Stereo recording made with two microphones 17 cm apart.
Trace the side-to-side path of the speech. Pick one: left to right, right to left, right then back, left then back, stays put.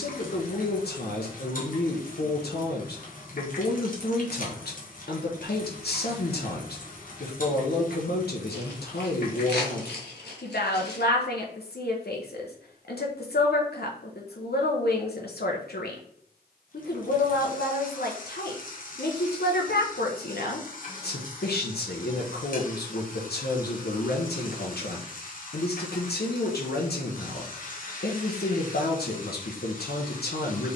stays put.